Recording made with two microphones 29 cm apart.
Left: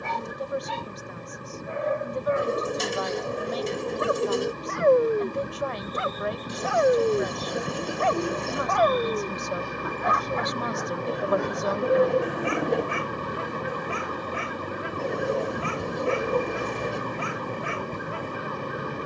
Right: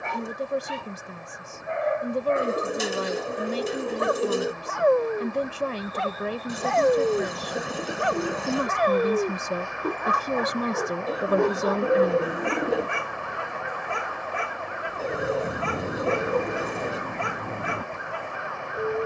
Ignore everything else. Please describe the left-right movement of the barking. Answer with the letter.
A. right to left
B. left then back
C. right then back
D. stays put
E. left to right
E.